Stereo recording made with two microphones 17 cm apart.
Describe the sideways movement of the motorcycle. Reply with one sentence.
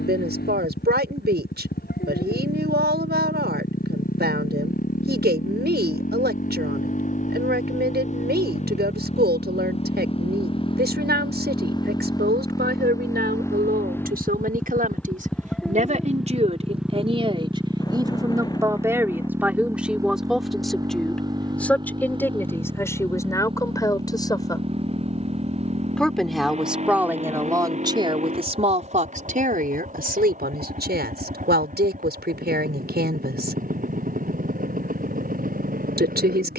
In this clip you hear the motorcycle move from left to right.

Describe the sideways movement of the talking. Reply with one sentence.
You can hear the talking go left and come back.